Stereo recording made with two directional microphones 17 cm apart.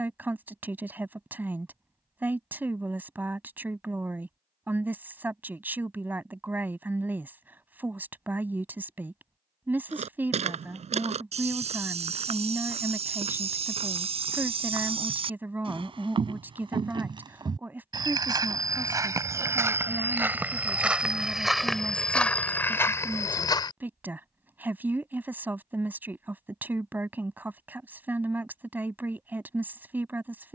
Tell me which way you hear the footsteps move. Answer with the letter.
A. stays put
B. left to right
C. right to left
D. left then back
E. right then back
C.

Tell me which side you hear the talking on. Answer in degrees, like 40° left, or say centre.
10° right.